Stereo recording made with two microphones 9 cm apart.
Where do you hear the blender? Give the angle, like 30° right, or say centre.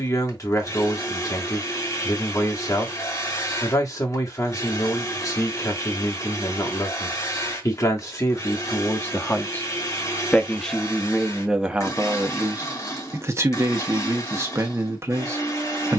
40° left.